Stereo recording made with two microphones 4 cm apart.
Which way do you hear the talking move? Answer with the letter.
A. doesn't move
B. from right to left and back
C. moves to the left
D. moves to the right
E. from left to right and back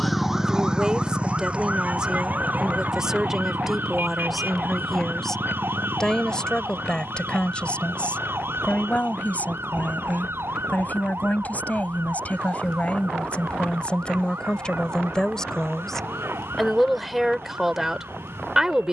B.